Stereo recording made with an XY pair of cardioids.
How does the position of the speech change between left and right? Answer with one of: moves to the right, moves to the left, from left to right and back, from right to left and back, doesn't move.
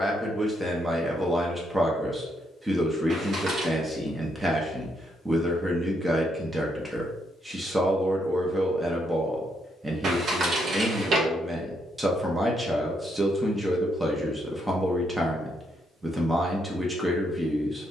doesn't move.